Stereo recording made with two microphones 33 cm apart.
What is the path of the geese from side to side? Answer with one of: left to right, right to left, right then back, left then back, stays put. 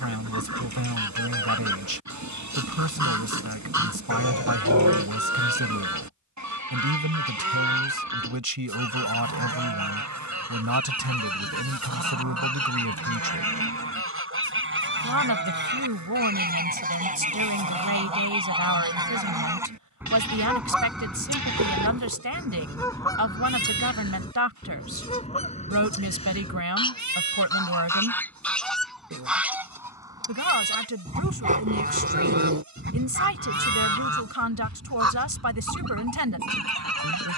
left then back.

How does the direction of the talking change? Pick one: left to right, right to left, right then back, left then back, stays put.
stays put.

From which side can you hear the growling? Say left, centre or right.
right.